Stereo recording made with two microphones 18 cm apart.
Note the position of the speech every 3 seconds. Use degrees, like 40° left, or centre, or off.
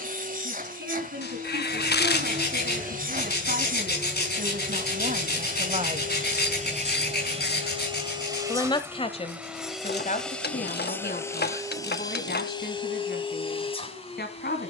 70° right, 50° right, 20° left, 50° left, 60° left.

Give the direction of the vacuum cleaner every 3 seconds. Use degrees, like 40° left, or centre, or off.
50° right, 50° right, 30° right, 10° left, 30° left.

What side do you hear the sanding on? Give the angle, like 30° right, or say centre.
60° left.